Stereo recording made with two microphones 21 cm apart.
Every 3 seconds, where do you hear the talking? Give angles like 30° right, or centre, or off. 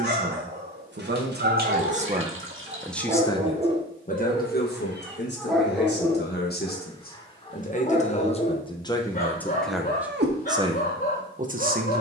40° right, 40° left, 40° left, 20° right.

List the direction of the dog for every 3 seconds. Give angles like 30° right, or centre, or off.
50° right, 20° right, 30° left, 50° left.